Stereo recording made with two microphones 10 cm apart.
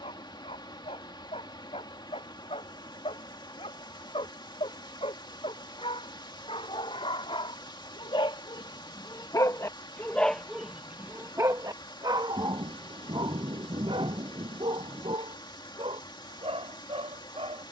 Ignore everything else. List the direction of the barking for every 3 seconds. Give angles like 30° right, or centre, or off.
80° left, 70° left, 60° left, centre, 60° right, 80° right.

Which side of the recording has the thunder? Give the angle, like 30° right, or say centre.
60° right.